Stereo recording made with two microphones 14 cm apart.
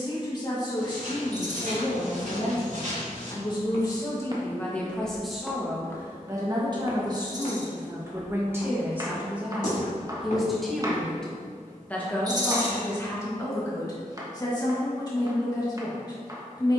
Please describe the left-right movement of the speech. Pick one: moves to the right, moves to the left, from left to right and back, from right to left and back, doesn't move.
from left to right and back.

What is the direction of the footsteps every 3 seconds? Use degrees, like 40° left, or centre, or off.
70° right, 30° right, 50° left, 70° left, off, off.